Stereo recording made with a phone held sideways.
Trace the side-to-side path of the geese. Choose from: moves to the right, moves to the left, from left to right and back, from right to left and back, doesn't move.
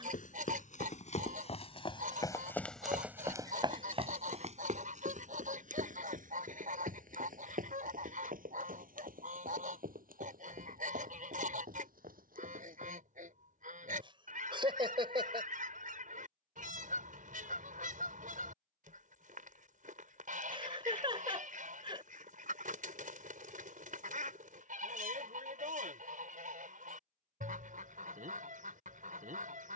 doesn't move.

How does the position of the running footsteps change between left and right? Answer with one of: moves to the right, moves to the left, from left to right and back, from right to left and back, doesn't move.
moves to the right.